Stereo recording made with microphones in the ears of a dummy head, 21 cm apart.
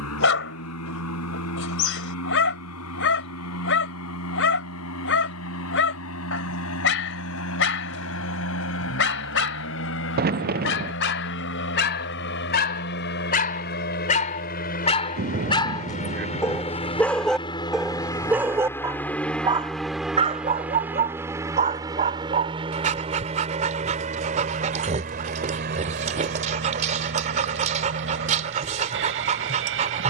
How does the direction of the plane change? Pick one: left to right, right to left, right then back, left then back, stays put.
left to right.